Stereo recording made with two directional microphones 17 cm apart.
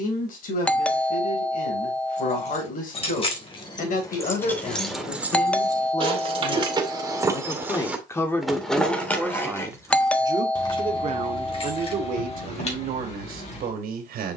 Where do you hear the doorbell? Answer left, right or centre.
centre.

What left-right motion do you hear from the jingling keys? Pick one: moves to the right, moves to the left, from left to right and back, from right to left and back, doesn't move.
from left to right and back.